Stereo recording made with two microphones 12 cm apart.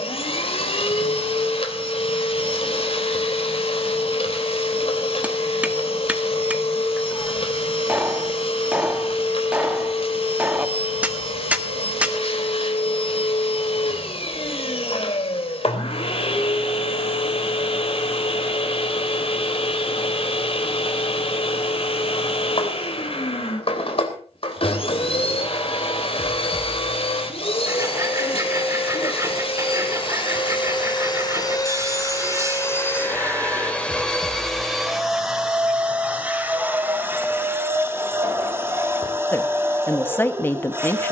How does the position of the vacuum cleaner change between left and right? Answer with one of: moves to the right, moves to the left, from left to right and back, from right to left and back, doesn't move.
moves to the right.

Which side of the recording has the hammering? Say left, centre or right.
centre.